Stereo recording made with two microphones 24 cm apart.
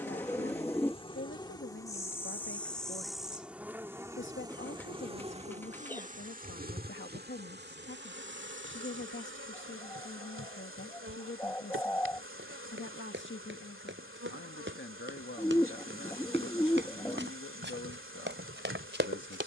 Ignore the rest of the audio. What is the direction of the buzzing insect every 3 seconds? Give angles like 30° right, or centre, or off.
20° left, 20° right, 40° right, 60° right, 60° right, 60° right, 60° right.